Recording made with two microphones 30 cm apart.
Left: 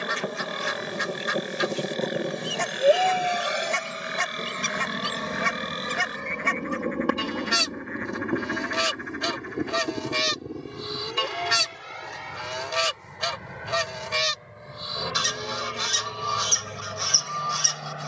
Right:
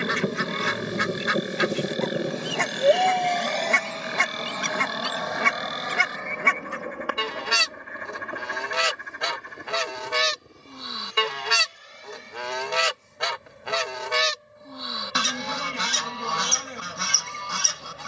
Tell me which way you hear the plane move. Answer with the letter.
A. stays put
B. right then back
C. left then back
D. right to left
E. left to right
D.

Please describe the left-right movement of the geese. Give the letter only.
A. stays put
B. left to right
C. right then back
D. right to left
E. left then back
A.